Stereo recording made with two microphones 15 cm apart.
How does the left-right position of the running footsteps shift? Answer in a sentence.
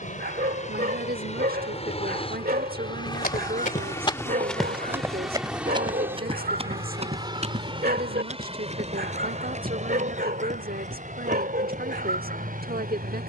You can hear the running footsteps travel towards the right.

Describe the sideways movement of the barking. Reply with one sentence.
In this clip you hear the barking stay put.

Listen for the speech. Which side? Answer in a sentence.
In this clip you hear the speech on the right.